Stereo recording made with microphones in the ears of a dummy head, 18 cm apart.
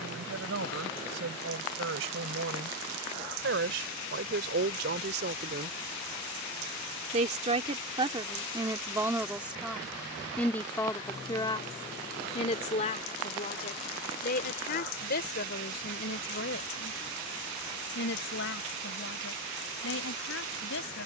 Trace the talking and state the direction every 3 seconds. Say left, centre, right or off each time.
right, right, right, centre, left, left, left.